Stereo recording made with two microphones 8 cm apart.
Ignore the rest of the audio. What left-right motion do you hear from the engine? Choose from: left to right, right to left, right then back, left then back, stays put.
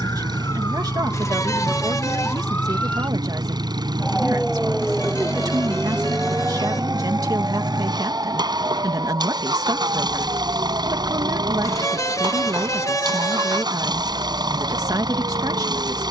stays put.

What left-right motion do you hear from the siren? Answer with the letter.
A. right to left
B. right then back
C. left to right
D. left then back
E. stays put
C.